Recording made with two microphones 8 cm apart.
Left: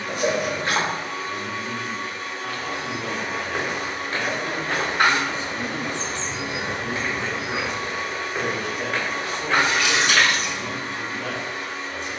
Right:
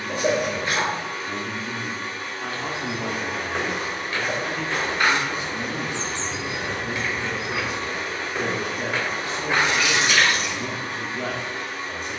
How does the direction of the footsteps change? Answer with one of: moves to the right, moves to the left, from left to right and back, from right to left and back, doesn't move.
from right to left and back.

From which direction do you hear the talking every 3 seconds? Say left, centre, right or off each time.
right, centre, centre, right.